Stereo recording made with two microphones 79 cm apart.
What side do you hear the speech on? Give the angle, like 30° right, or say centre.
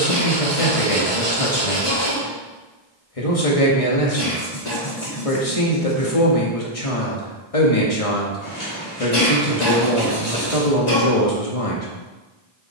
40° left.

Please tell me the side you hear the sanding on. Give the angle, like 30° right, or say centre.
20° left.